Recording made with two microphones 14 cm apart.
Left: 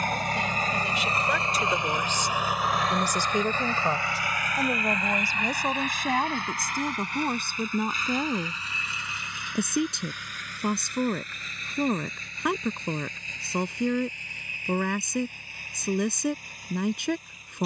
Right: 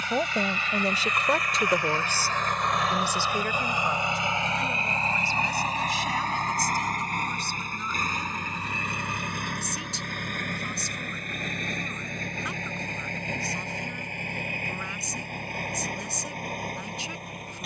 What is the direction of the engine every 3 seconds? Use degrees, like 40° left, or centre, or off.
30° left, 30° right, 50° right, 60° right, 60° right, 70° right.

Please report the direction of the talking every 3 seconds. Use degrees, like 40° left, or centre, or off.
30° right, 40° left, 60° left, 70° left, 70° left, 70° left.